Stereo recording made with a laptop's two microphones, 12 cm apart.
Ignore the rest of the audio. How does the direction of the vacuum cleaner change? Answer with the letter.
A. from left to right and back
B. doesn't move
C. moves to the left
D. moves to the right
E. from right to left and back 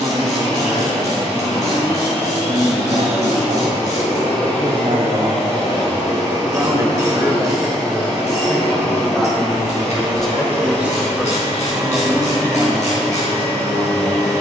B.